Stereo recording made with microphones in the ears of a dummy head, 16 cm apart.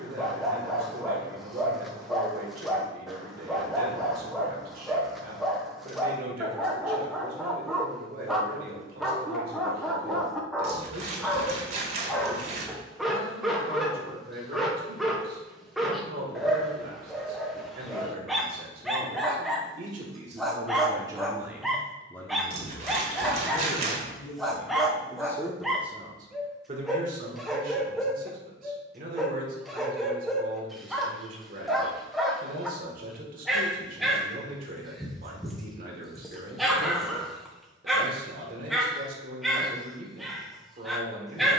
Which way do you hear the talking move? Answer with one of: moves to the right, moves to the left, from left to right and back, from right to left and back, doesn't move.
from right to left and back.